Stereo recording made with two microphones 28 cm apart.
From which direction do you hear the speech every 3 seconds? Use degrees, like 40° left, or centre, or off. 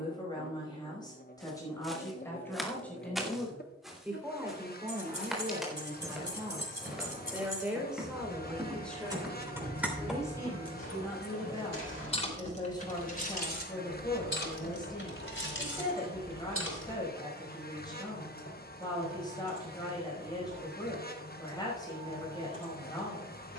10° left, 10° right, 10° right, 10° left, 20° left, 20° left, 20° left, 20° left.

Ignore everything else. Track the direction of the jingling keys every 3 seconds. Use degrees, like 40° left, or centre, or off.
off, 50° right, 30° right, centre, 40° left, 50° left, off, off.